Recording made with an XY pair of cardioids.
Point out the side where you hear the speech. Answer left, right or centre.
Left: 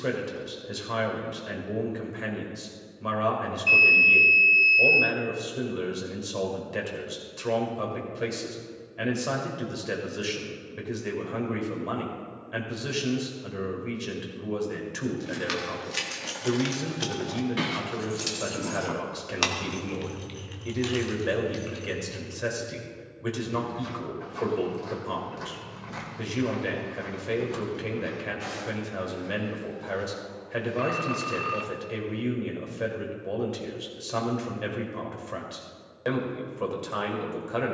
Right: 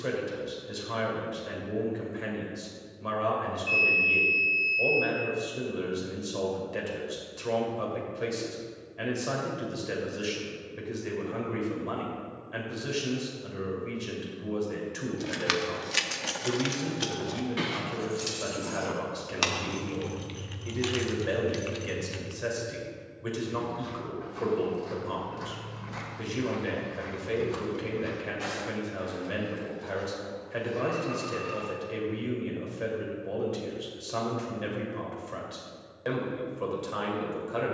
left.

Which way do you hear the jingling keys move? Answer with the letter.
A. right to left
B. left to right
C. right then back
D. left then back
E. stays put
D.